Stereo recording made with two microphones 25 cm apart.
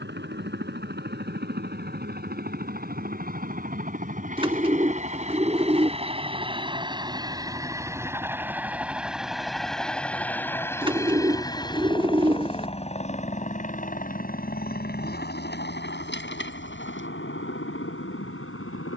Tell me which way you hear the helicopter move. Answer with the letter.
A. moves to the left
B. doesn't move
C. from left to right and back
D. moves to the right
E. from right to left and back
A.